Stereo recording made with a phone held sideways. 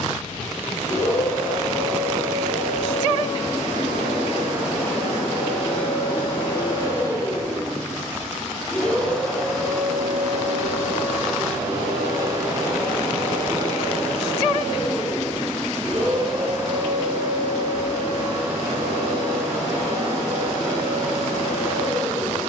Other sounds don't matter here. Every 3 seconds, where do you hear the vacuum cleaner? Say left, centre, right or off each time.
left, left, left, centre, right, right, right, right.